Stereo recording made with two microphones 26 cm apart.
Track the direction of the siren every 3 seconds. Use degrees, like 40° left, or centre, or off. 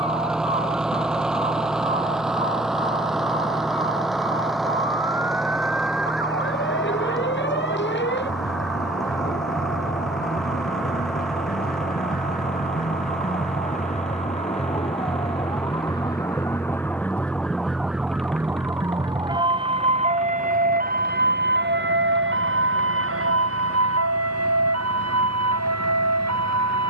50° left, 50° left, 50° left, 40° left, 30° left, 10° left, 20° right, 50° right, 70° right.